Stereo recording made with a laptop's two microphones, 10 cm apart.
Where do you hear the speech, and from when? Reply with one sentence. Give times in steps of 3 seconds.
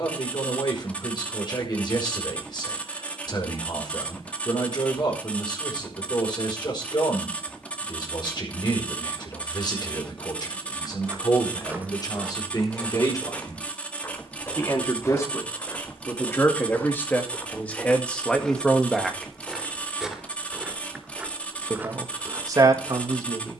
You can hear the speech on the left from 0 s, in the centre from 18 s and on the right from 21 s.